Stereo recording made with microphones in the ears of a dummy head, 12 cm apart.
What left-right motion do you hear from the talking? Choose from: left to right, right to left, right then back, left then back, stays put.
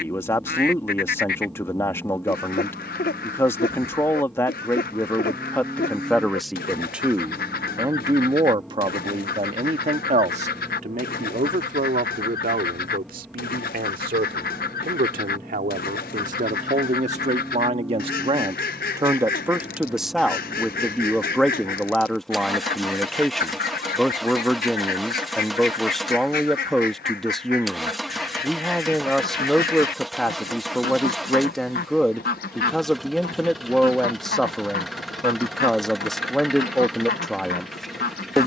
right then back.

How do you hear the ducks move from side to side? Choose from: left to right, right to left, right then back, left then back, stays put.
stays put.